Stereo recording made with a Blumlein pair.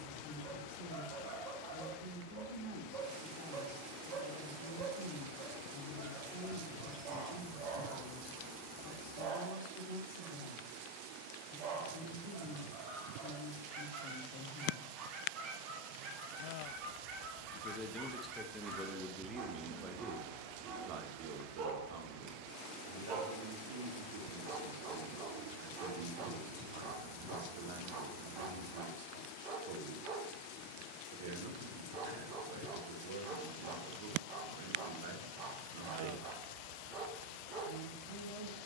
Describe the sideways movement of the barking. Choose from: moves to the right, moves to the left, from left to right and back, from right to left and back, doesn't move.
doesn't move.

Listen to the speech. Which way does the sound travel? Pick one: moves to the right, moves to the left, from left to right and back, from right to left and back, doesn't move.
moves to the right.